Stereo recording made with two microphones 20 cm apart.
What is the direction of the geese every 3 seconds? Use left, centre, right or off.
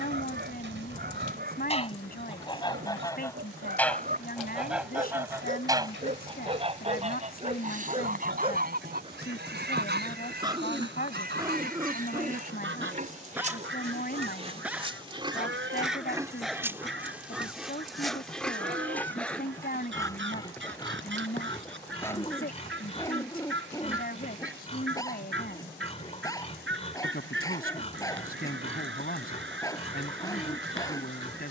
left, centre, right, right, right, right, right, right, right, right, right.